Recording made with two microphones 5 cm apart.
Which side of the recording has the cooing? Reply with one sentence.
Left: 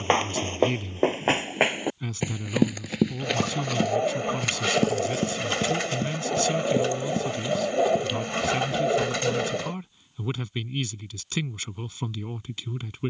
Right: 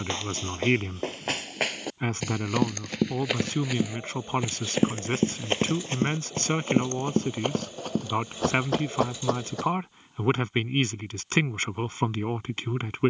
In this clip you hear the cooing on the left.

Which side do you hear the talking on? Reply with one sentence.
In this clip you hear the talking on the right.